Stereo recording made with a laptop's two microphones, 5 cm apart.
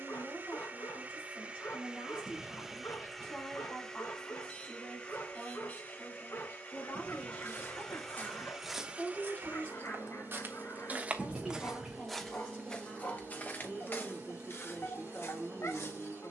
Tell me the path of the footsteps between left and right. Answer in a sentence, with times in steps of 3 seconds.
In this clip you hear the footsteps not at all from 0 s, on the left from 6 s, on the right from 9 s and on the left from 12 s.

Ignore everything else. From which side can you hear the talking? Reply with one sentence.
You can hear the talking on the left.